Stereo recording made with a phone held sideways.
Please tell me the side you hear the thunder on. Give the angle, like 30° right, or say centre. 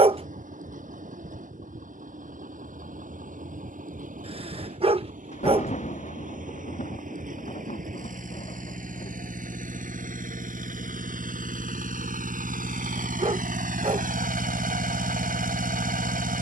50° left.